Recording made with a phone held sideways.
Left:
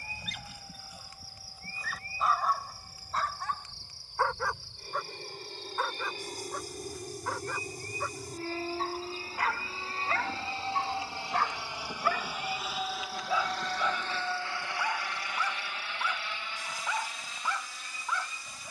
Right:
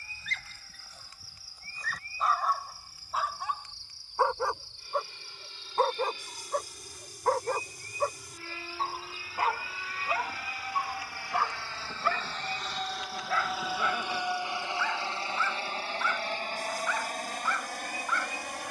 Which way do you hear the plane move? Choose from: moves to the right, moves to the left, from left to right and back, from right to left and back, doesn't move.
moves to the right.